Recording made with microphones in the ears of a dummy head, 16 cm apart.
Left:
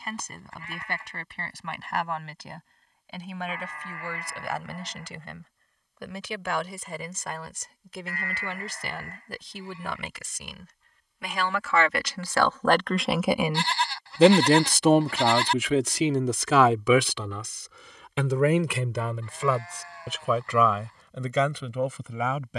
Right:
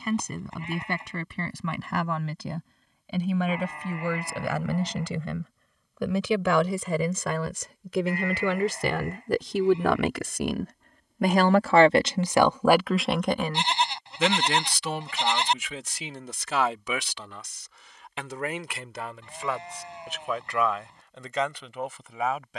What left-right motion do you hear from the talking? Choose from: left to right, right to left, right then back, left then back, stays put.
right to left.